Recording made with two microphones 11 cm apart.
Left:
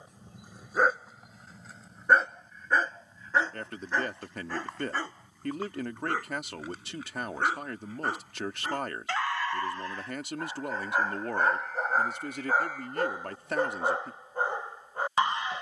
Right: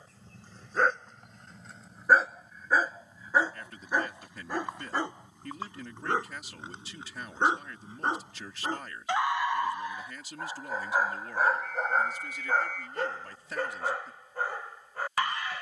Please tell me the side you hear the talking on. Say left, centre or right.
left.